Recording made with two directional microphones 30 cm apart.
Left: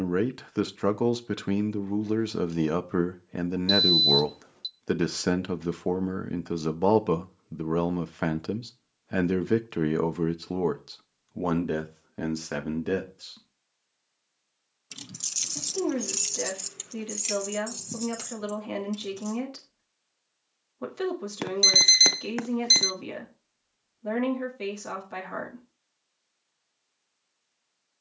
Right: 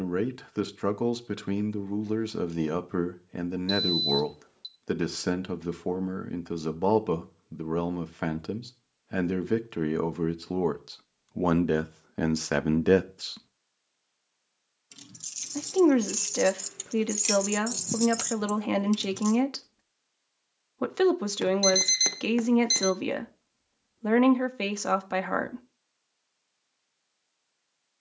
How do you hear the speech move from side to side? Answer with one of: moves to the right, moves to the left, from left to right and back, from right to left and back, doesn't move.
moves to the right.